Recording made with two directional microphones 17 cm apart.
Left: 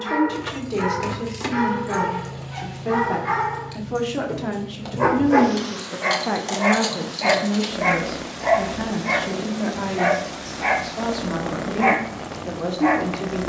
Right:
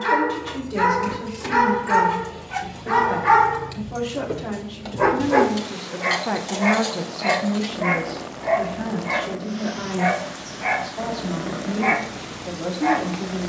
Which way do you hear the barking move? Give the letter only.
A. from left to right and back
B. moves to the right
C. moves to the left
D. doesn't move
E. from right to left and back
C.